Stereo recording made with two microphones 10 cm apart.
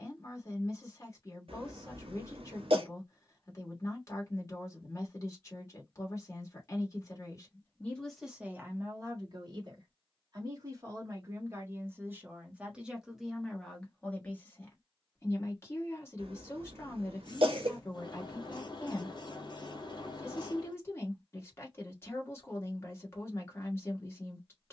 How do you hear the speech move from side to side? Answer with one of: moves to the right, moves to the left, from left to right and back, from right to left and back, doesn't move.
from left to right and back.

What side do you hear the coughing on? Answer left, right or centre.
right.